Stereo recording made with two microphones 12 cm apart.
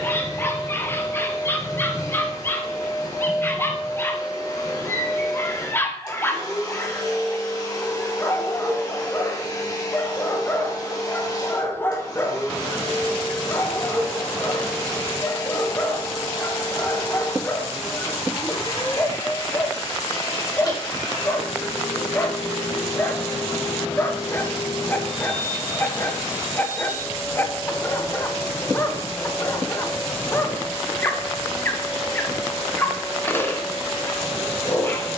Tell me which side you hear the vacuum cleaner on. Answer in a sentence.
You can hear the vacuum cleaner on the left.